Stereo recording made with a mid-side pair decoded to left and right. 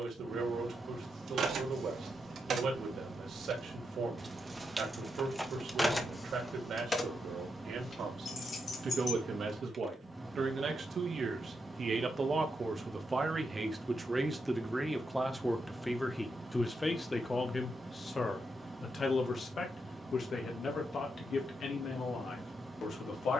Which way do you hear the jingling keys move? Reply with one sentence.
You can hear the jingling keys travel towards the left.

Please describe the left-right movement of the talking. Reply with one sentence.
In this clip you hear the talking travel towards the left.